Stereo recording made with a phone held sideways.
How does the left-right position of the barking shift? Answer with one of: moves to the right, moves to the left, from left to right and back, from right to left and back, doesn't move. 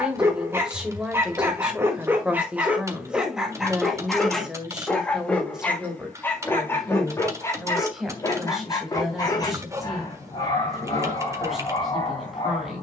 moves to the left.